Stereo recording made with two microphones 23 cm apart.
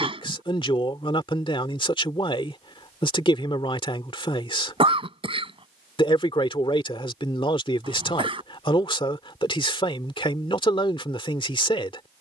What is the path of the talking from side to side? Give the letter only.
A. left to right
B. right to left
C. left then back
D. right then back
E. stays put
E.